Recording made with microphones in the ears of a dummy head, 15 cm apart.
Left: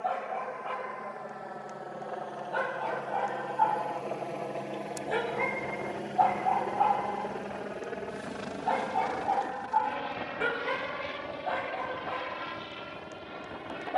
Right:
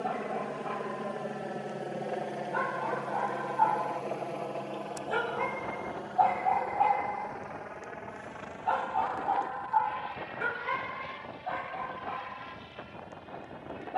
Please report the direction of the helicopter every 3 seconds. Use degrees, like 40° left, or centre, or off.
30° right, centre, 30° left, 50° left, 60° left.